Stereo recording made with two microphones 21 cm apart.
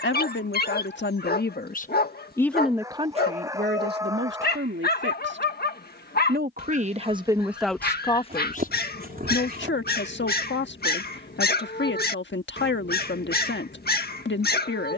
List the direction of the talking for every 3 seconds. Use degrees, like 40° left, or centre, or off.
40° left, 50° right, 10° right, 60° left, 60° left.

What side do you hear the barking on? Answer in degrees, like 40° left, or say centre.
50° left.